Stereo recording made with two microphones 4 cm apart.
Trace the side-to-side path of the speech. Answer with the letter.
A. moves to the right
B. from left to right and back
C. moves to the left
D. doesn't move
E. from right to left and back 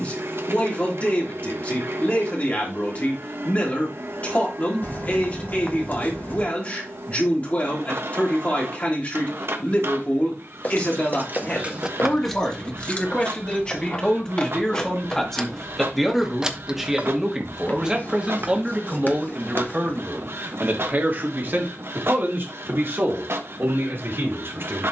A.